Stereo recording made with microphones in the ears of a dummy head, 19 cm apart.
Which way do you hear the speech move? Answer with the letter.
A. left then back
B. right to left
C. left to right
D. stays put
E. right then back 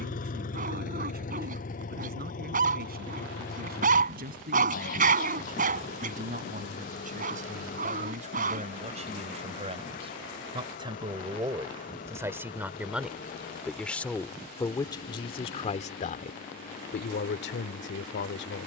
B.